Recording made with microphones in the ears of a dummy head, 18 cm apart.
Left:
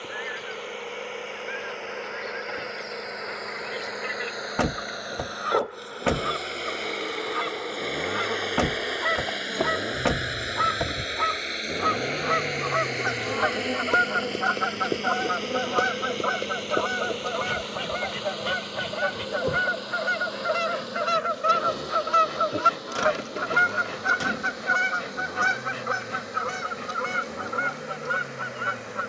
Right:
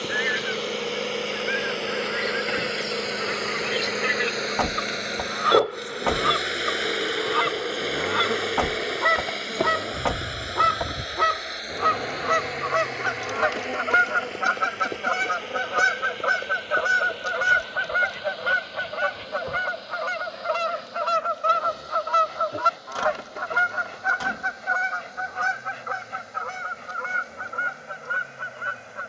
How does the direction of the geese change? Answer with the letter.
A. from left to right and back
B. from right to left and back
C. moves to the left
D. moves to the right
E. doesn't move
C.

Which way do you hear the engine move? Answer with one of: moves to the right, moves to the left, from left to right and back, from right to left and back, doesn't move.
moves to the left.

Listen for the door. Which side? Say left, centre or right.
left.